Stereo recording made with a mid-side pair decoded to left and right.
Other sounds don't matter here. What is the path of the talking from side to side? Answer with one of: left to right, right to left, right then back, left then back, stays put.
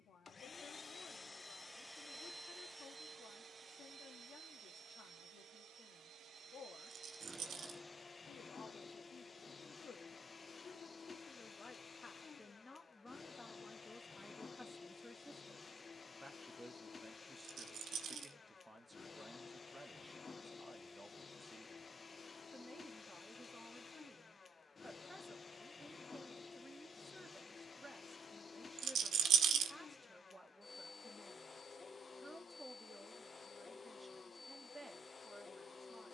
left to right.